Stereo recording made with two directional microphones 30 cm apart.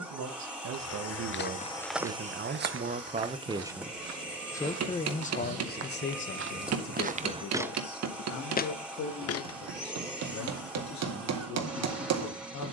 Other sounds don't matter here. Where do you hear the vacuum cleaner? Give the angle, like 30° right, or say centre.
centre.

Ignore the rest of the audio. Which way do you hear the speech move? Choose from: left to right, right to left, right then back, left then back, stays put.
right to left.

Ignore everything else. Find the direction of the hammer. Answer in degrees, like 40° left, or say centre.
60° right.